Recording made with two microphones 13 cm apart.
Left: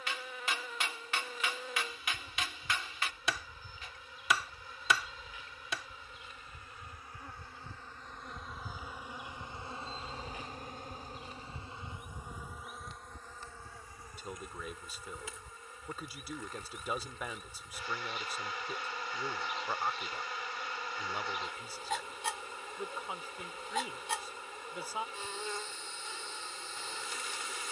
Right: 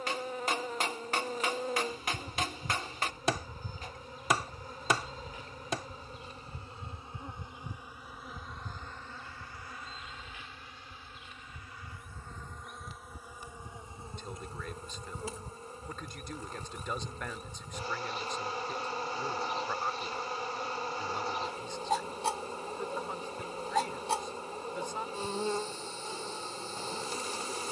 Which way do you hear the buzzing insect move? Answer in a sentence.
You can hear the buzzing insect go left and come back.